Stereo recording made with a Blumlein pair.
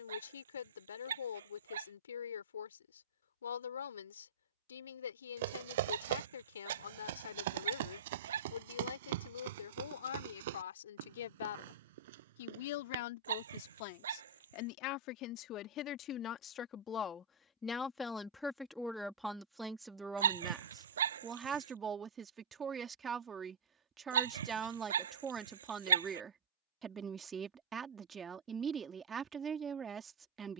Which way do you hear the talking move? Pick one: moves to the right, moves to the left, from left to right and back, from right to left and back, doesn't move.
moves to the right.